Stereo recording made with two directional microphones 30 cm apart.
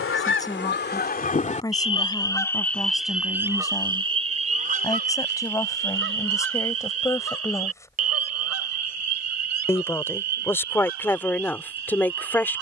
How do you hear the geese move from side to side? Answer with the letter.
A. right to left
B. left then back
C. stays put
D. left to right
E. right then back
D.